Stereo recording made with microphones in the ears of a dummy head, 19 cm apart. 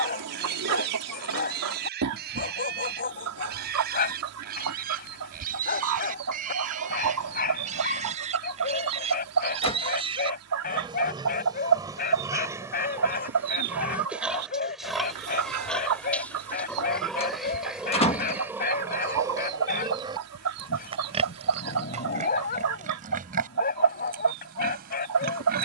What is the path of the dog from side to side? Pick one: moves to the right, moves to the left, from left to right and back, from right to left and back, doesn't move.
doesn't move.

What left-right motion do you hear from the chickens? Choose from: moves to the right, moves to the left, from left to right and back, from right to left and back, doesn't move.
doesn't move.